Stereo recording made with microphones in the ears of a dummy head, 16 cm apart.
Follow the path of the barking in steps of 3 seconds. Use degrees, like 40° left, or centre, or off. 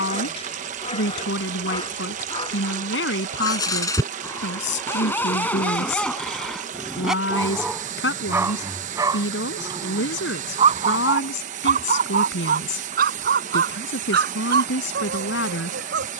30° left, 20° left, 10° right, 30° right, 60° right, 70° right.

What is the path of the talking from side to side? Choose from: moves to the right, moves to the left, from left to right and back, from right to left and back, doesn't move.
doesn't move.